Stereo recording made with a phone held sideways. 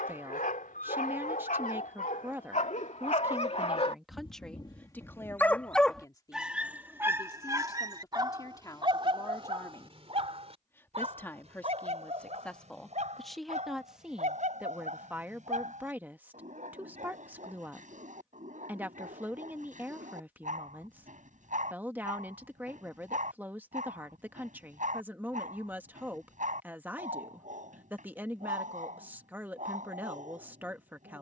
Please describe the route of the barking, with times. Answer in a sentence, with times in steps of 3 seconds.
In this clip you hear the barking on the left from 0 s and on the right from 6 s.